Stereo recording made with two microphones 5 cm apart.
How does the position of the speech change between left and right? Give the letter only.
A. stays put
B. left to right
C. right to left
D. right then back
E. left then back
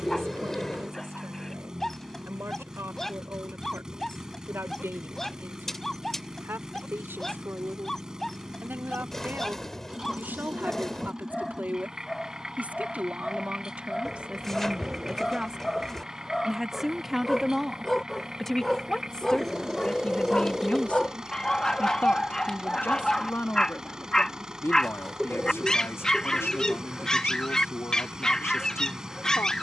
C.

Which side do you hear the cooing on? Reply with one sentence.
You can hear the cooing in the centre.